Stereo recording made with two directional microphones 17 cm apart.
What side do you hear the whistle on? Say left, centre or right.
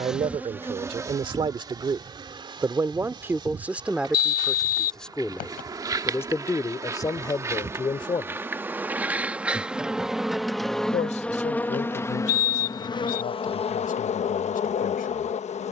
left.